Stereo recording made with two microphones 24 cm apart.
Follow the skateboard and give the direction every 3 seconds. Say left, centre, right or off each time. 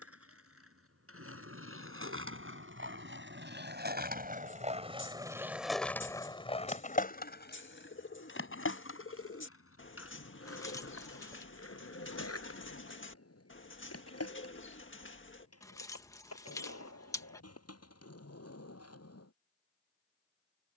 right, right, left, left, left, left, left.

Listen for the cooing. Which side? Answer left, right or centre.
left.